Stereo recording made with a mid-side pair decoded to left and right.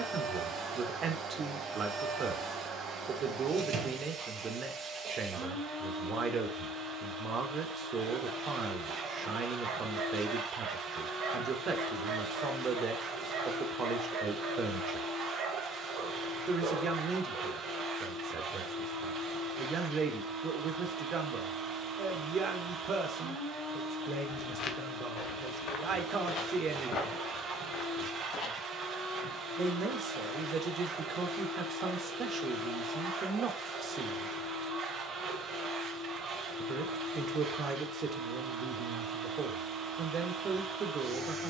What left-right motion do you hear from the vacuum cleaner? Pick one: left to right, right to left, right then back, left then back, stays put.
stays put.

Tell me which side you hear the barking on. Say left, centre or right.
right.